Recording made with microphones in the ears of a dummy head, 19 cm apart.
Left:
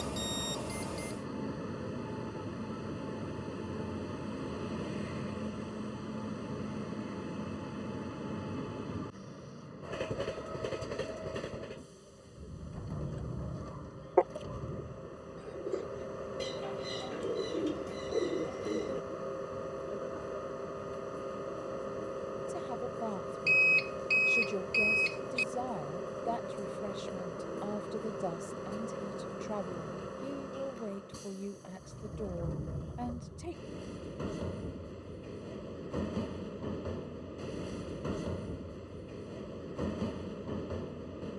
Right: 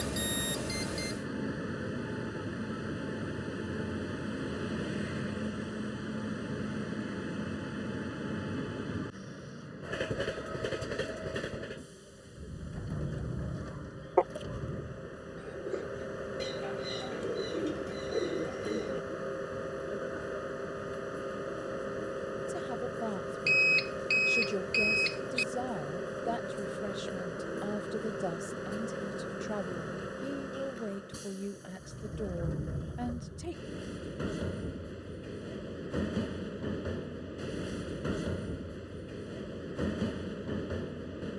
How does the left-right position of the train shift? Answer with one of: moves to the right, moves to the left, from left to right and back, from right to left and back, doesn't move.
doesn't move.